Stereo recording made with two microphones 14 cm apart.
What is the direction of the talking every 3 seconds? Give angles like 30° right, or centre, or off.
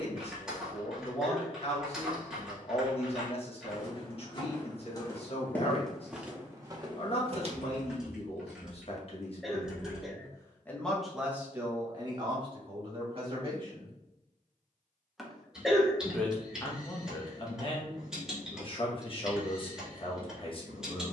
50° left, 50° left, 50° left, 20° left, 40° right, 30° left, 40° left.